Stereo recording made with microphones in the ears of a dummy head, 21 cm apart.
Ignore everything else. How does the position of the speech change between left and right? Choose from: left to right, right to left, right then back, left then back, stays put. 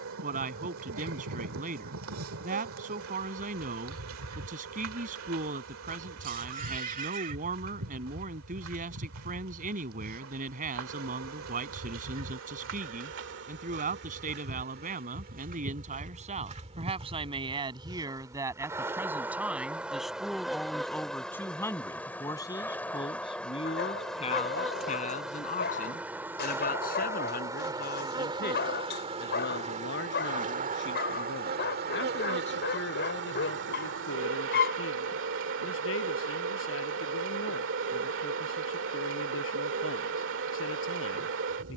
right to left.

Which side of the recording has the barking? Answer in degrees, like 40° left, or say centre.
50° left.